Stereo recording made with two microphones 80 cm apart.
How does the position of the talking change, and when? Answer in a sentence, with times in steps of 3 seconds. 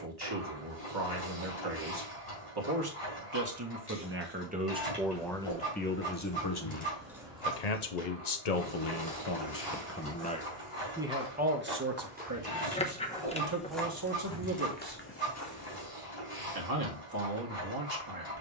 In this clip you hear the talking on the right from 0 s, in the centre from 3 s, on the left from 6 s, in the centre from 9 s and on the right from 12 s.